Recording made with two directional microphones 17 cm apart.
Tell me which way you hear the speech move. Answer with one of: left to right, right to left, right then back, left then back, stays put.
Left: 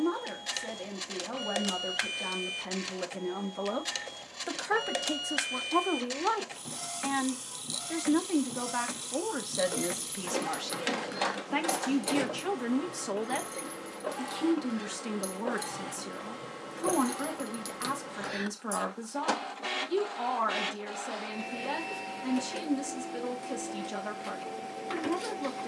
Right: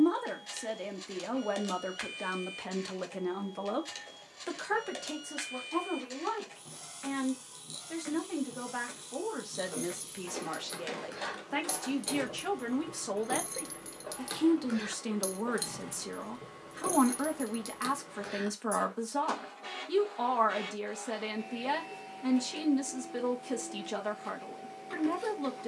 left then back.